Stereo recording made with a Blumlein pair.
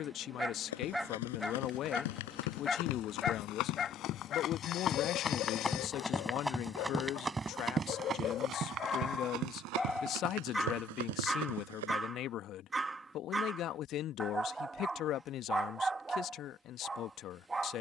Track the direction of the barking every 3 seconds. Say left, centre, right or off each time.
centre, left, left, centre, centre, centre.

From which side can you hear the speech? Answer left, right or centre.
left.